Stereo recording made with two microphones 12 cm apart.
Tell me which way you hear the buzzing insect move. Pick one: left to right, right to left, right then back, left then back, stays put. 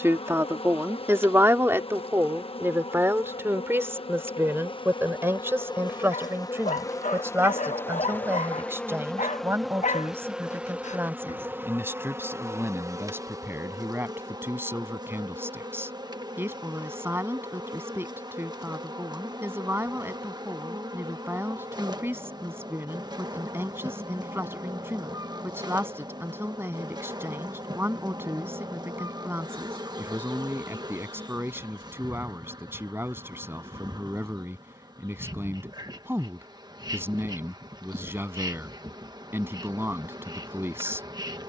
left to right.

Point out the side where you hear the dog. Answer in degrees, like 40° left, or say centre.
70° left.